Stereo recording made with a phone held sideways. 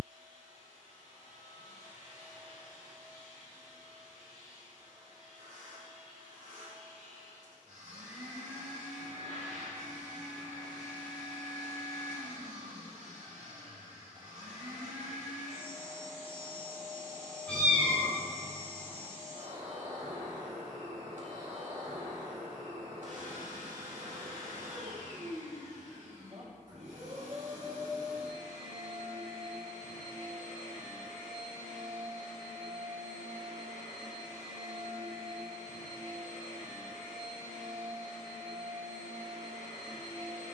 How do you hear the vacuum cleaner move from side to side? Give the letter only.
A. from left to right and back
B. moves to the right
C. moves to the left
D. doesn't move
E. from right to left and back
D.